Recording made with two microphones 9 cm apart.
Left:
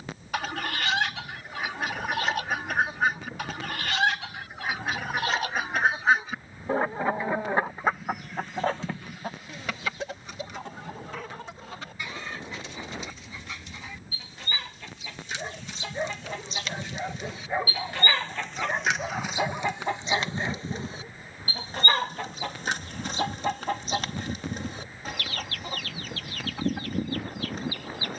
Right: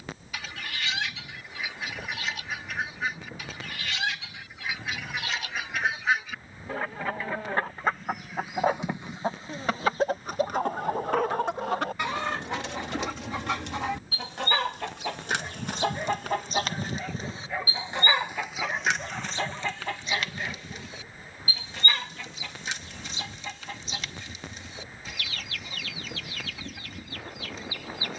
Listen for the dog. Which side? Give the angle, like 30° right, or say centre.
20° left.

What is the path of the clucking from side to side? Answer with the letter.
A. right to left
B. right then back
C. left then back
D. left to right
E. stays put
B.